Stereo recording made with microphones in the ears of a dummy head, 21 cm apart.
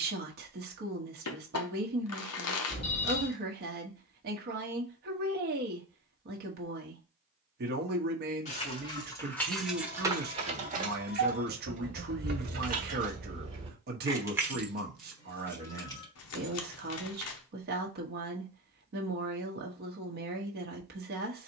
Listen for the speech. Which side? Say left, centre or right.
right.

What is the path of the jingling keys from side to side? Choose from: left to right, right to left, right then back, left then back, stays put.
right then back.